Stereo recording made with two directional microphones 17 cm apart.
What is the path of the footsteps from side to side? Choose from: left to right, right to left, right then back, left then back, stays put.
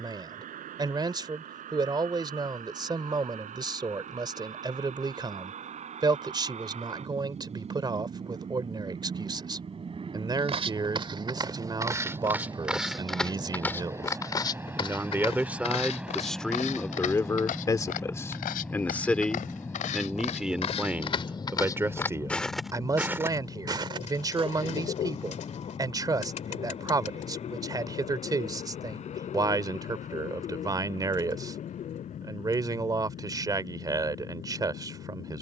left then back.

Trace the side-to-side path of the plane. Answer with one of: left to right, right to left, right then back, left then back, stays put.
right to left.